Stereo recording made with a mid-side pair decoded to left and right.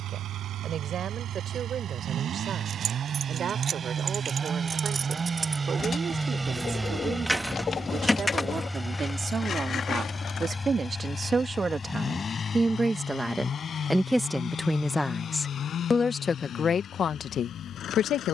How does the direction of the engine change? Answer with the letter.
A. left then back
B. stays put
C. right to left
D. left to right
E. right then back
C.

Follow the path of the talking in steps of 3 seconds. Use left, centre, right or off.
right, right, right, right, centre, left.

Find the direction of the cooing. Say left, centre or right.
left.